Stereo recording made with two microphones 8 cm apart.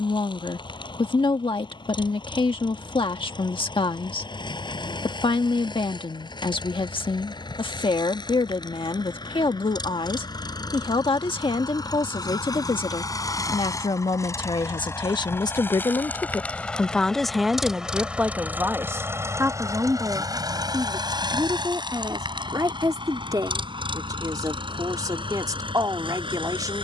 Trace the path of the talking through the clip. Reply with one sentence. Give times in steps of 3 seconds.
In this clip you hear the talking on the left from 0 s and on the right from 18 s.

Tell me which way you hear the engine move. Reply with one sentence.
In this clip you hear the engine go from the left side to the right.